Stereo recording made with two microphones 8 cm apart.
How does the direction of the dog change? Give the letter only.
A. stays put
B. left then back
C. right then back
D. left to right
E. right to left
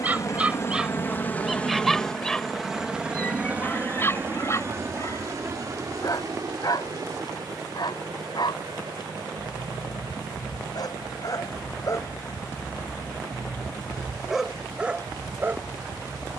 B.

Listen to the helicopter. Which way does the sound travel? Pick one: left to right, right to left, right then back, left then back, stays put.
left to right.